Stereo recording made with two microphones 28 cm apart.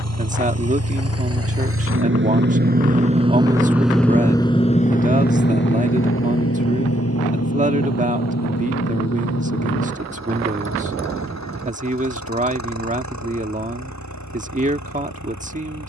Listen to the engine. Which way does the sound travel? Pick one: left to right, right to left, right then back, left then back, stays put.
right to left.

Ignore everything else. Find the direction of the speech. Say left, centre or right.
right.